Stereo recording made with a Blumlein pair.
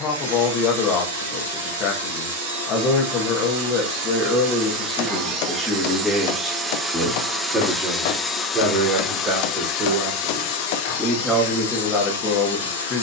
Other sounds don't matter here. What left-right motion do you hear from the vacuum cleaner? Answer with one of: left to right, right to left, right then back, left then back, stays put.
right to left.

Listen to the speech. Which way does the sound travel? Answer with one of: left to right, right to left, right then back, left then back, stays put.
right then back.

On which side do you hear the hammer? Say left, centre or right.
left.